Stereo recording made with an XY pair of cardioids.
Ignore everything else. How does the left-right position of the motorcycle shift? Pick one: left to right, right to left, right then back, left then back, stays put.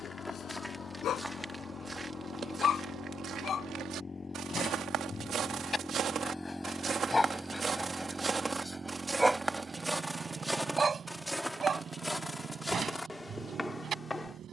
left to right.